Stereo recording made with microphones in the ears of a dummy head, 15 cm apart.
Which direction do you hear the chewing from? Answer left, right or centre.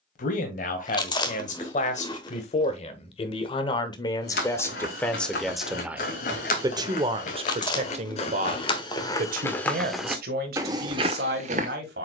left.